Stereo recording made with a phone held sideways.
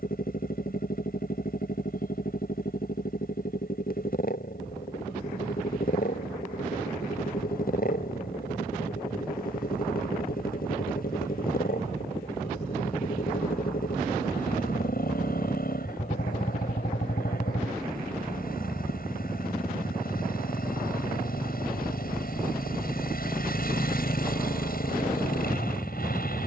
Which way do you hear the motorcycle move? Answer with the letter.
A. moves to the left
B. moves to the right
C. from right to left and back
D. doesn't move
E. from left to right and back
D.